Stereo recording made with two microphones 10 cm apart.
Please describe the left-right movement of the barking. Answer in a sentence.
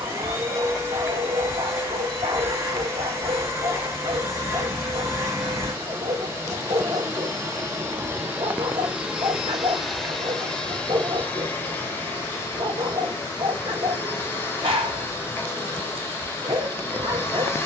You can hear the barking stay put.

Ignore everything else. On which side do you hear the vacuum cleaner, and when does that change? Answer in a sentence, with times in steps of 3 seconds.
You can hear the vacuum cleaner on the right from 0 s, in the centre from 9 s and on the left from 12 s.